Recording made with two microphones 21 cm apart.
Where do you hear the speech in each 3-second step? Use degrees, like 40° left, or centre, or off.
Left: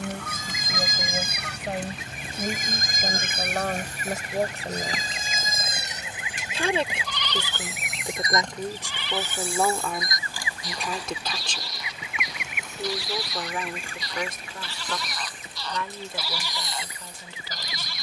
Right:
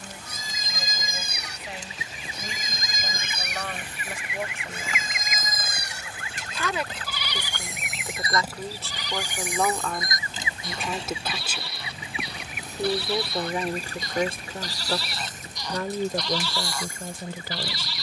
50° left, 40° left, 20° left, centre, 30° right, 50° right.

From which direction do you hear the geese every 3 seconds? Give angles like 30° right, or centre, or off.
60° left, 40° left, centre, 20° right, 40° right, 50° right.